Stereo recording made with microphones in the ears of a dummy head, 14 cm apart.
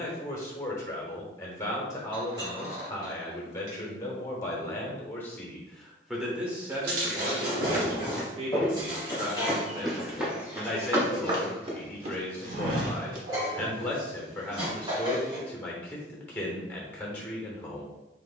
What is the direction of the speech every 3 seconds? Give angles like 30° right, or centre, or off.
20° left, 20° left, 20° right, 10° right, 10° left, 10° left.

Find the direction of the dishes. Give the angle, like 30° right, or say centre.
30° right.